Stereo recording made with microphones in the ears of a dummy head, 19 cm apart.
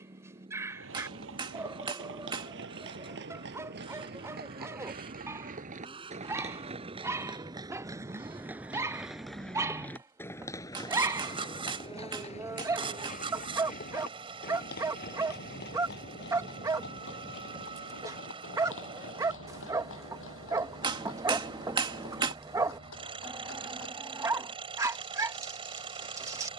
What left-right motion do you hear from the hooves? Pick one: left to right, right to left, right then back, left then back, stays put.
right to left.